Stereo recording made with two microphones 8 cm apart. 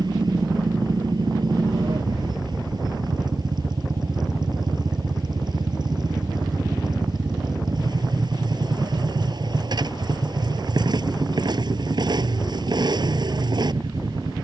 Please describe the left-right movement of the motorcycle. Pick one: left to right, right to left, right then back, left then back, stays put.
stays put.